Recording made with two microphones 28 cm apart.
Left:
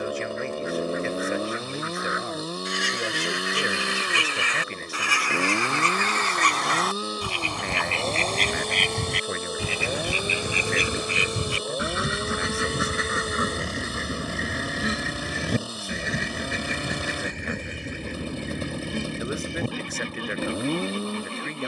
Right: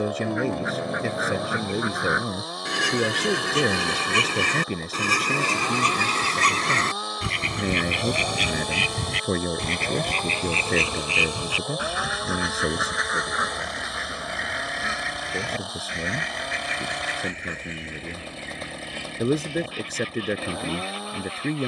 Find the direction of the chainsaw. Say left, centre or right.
left.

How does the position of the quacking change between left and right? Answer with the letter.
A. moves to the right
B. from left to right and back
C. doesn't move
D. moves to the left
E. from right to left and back
D.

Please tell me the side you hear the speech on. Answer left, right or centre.
right.